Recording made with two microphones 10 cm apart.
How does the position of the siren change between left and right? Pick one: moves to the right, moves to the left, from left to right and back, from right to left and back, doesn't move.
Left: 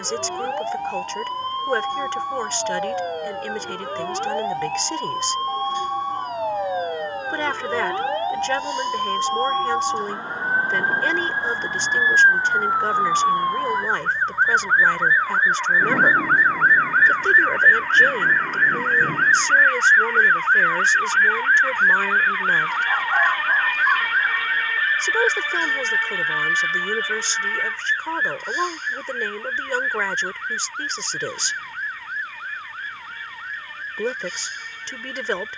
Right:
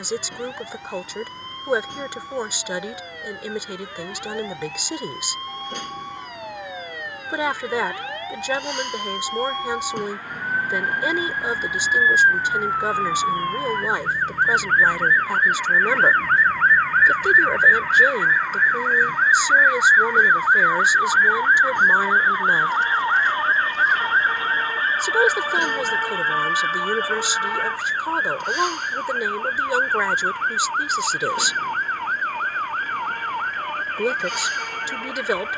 moves to the right.